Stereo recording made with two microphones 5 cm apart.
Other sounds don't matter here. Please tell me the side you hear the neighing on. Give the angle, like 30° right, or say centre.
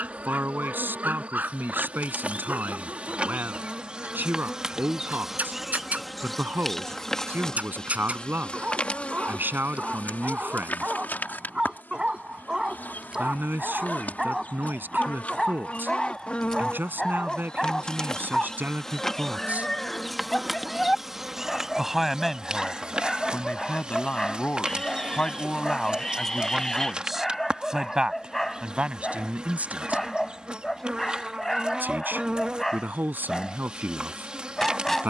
10° left.